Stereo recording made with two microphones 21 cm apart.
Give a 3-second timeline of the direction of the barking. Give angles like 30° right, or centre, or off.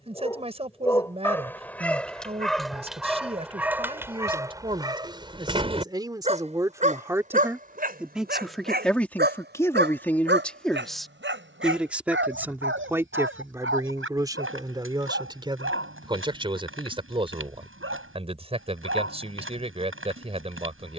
10° left, 10° right, 40° right, 60° right, 70° right, 70° right, 70° right.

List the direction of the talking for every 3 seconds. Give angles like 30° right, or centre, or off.
30° right, 20° right, 10° right, 10° left, 10° right, 20° right, 30° right.